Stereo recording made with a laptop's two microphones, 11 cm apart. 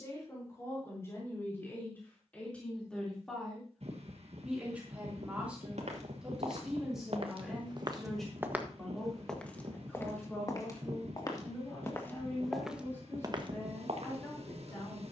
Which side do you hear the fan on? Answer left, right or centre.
right.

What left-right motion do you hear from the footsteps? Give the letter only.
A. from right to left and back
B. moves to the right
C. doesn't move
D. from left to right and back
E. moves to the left
A.